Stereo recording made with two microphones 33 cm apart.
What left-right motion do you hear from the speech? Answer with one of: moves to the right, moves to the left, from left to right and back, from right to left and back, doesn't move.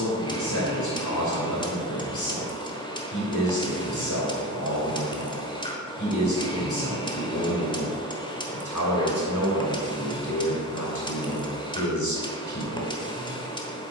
doesn't move.